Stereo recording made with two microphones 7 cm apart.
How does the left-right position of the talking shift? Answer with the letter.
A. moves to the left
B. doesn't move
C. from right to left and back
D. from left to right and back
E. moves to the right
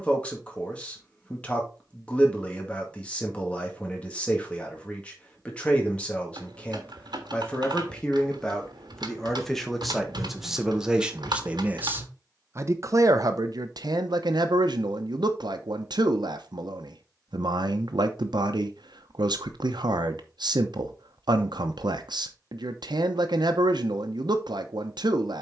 E.